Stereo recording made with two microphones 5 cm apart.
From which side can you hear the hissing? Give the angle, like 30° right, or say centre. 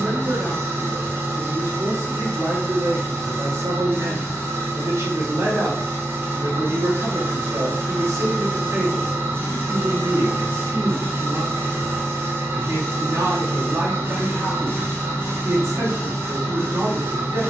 50° right.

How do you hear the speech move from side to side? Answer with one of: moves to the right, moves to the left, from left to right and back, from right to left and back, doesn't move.
doesn't move.